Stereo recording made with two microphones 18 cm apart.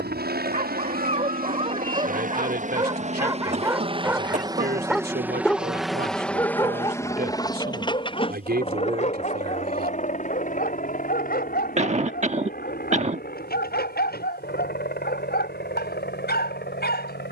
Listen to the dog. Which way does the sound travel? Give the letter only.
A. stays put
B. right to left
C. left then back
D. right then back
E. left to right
B.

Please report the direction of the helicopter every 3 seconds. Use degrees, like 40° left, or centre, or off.
50° right, 20° right, 20° left, 40° left, 50° left, 60° left.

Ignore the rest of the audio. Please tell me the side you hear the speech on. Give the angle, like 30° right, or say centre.
60° right.